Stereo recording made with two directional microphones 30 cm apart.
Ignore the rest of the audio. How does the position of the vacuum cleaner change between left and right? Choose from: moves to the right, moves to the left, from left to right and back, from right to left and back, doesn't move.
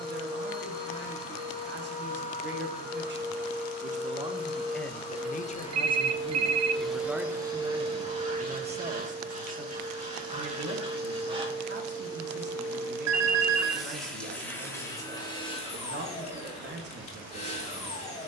from left to right and back.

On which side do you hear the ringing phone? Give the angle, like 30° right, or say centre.
60° right.